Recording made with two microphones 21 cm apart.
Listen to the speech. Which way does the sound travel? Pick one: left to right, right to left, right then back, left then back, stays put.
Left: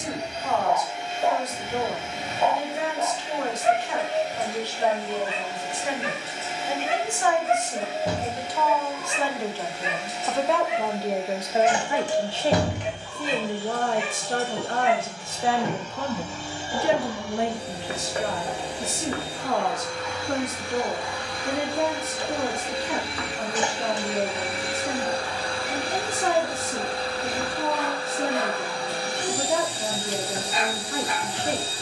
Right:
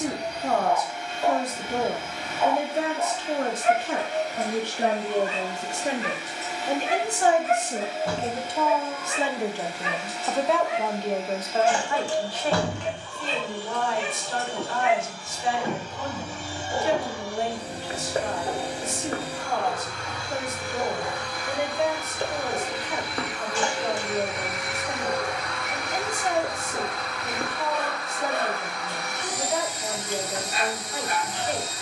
right to left.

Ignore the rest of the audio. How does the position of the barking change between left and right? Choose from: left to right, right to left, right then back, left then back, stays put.
left to right.